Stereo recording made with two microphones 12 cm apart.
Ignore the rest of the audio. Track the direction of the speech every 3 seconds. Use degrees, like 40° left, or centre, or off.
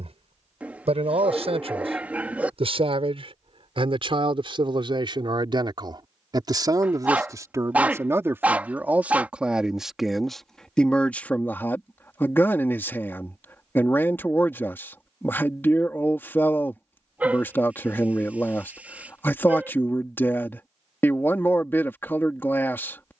50° right, 40° right, 30° right, centre, 20° left, 20° left, 20° left, 20° left.